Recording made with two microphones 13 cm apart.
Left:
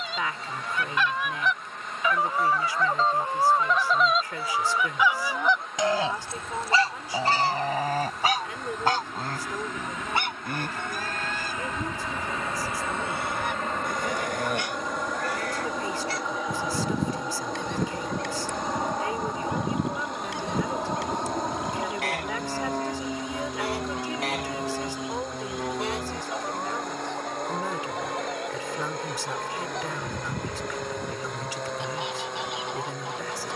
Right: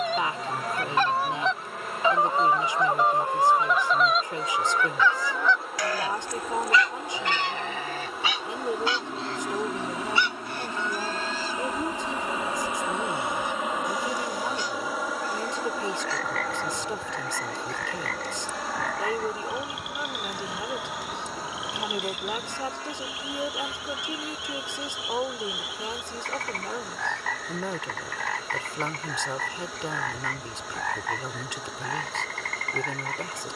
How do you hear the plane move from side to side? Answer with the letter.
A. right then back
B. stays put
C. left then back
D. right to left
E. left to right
D.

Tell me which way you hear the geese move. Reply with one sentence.
In this clip you hear the geese go from the right side to the left.